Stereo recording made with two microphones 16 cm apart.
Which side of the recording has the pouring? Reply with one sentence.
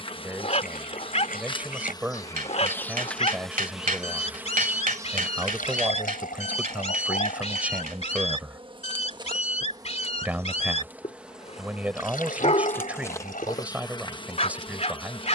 You can hear the pouring on the left.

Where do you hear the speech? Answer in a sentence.
In this clip you hear the speech in the centre.